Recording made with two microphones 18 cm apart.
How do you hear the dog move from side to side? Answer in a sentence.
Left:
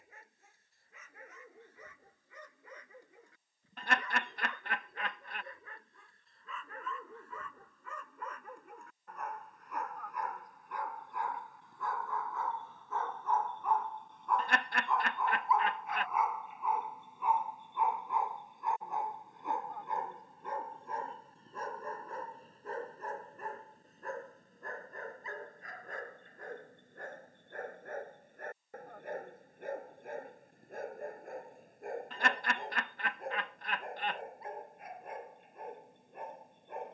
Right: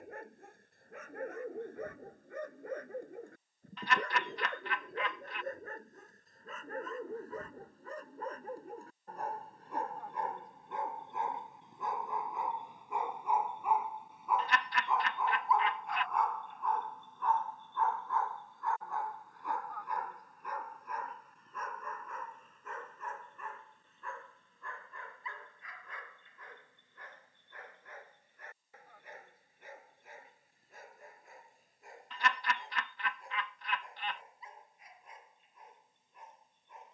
You can hear the dog move to the left.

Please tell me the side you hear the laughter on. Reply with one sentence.
You can hear the laughter on the left.